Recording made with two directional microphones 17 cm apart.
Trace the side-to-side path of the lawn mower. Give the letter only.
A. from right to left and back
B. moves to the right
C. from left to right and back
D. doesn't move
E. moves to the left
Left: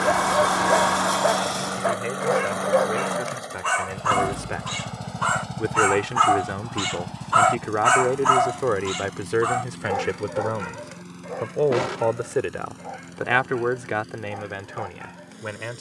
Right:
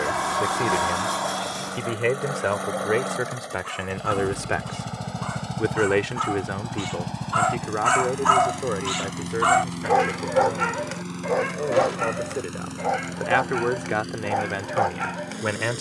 B.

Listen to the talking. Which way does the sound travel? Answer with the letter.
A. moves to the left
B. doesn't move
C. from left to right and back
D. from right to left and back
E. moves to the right
D.